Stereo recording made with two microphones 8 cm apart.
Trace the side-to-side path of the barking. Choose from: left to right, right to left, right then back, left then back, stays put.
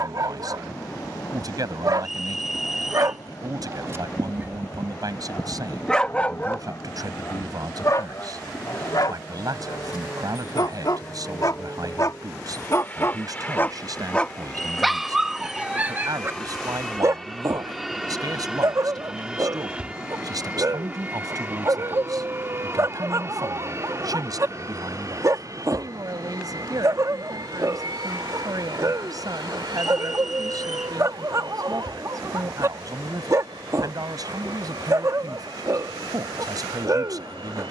left then back.